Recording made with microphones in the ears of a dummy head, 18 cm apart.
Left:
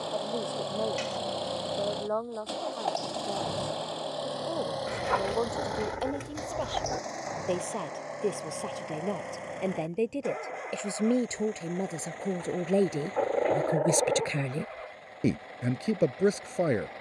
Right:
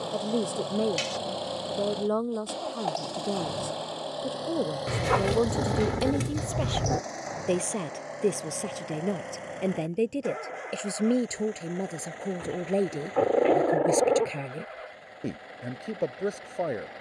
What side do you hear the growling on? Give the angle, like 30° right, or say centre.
50° right.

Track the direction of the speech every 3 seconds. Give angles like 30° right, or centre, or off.
40° right, 40° right, 30° right, 10° right, 10° left, 30° left.